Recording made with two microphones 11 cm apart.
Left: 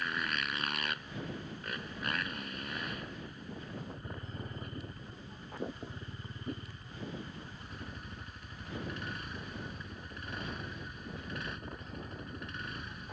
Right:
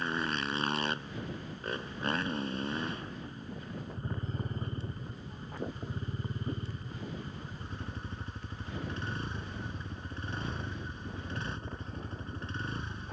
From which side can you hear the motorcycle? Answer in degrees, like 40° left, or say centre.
30° right.